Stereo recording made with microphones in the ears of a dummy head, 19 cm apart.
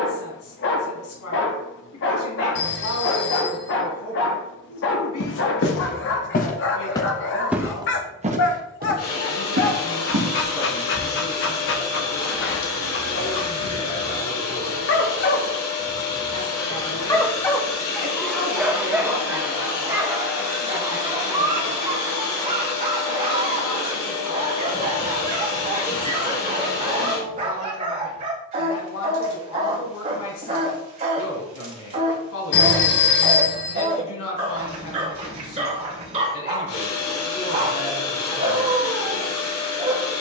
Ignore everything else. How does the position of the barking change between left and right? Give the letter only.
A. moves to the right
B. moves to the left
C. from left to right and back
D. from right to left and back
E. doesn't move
A.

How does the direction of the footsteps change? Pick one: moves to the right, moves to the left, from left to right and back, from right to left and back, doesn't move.
moves to the right.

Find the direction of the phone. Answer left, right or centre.
left.